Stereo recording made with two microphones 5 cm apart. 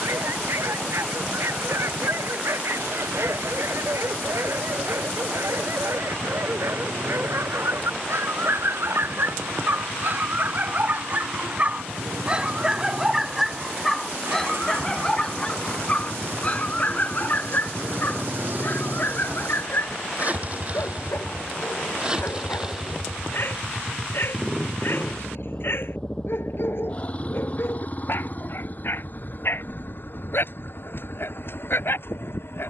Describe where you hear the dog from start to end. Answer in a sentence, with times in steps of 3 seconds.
In this clip you hear the dog on the right from 0 s, in the centre from 12 s and on the left from 15 s.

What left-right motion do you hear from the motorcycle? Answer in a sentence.
In this clip you hear the motorcycle travel towards the left.